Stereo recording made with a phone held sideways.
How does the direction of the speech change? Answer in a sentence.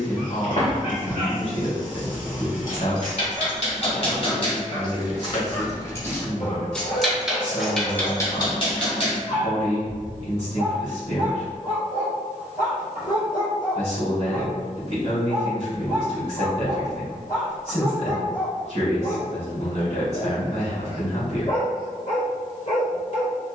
In this clip you hear the speech stay put.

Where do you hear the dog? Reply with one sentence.
In this clip you hear the dog on the left.